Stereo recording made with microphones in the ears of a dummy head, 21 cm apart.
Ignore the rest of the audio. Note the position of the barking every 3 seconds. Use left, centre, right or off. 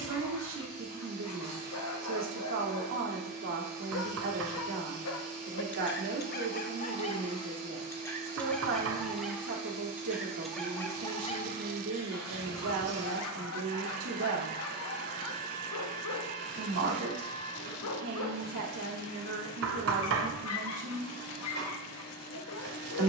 left, left, left, centre, left, left, left, left.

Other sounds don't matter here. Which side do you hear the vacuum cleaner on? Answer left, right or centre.
right.